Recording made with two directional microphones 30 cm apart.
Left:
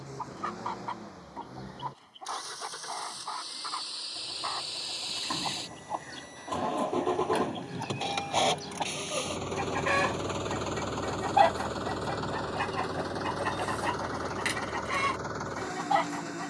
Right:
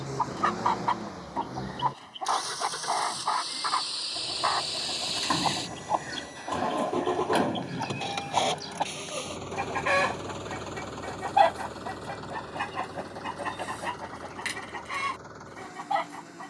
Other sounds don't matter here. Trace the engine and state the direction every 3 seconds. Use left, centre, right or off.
right, right, centre, left, left, left.